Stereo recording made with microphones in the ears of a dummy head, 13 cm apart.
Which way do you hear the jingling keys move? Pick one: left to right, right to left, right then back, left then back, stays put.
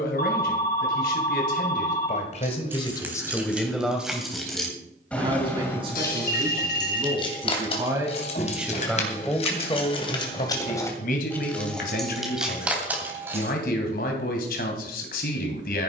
left then back.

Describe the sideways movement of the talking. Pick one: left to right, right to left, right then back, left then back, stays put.
right then back.